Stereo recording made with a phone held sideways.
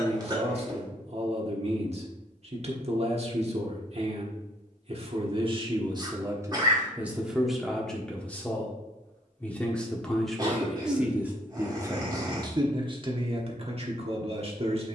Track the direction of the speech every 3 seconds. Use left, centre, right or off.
right, right, centre, centre, right.